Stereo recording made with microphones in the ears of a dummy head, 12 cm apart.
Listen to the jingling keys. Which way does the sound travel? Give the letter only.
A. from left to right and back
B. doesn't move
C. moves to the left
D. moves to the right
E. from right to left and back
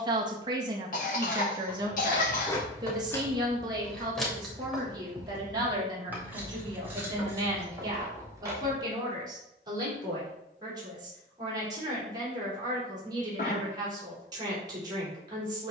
D.